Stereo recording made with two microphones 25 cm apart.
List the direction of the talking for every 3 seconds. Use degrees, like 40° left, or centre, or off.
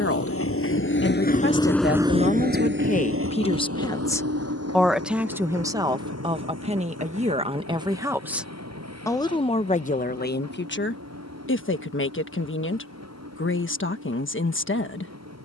50° left, 10° left, 20° right, 40° left, 50° left.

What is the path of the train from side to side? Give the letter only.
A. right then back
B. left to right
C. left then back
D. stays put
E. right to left
B.